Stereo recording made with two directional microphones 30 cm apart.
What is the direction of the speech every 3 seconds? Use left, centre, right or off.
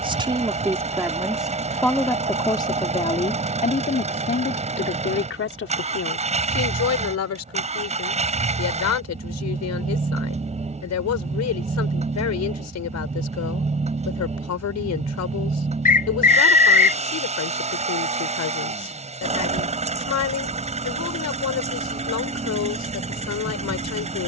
centre, left, left, left, left, left, left, left.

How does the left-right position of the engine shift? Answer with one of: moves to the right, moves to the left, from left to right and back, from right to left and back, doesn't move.
doesn't move.